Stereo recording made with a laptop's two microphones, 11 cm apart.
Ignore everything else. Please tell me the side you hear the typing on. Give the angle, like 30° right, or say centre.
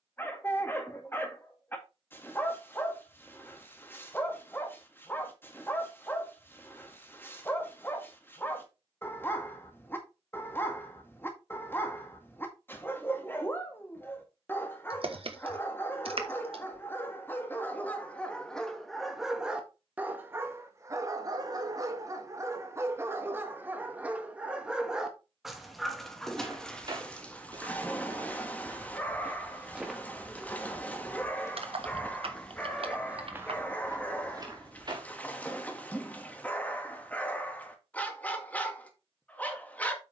60° right.